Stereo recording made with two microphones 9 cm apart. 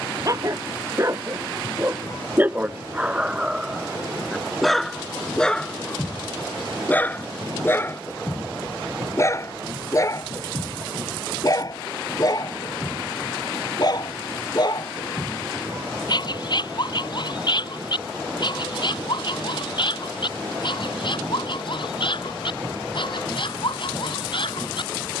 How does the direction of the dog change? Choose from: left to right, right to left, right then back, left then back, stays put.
right to left.